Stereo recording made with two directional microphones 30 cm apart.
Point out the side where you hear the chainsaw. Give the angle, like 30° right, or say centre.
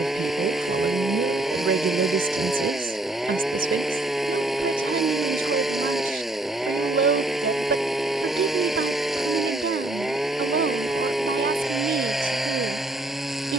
centre.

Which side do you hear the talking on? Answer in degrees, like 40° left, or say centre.
40° right.